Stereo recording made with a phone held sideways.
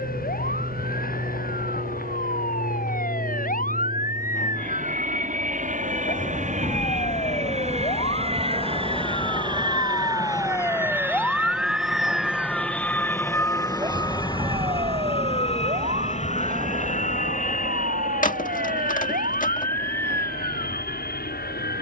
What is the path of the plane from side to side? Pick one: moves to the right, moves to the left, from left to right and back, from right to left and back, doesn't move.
moves to the left.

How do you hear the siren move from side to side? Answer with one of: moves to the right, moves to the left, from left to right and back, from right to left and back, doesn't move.
moves to the right.